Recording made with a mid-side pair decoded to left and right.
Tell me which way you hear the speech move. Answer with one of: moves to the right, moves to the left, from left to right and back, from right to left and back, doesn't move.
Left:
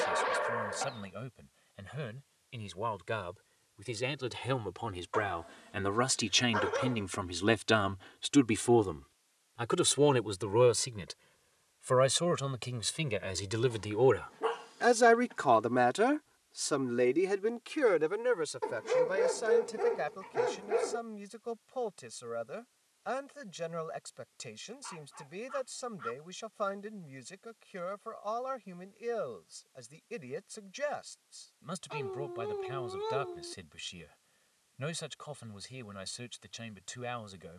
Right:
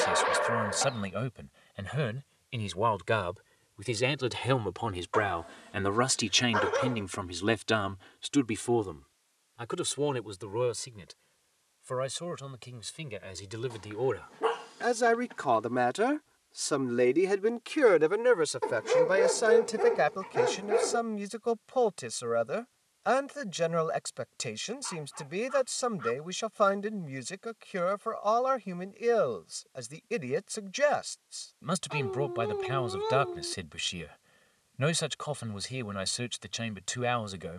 from right to left and back.